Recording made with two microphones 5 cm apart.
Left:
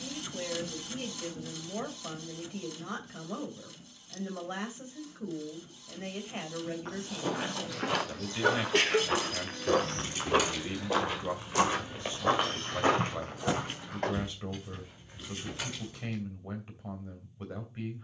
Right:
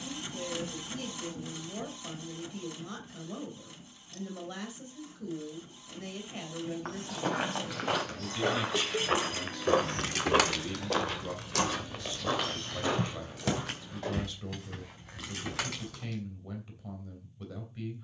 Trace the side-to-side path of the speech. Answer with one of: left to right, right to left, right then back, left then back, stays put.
stays put.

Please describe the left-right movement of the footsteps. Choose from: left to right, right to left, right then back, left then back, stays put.
right to left.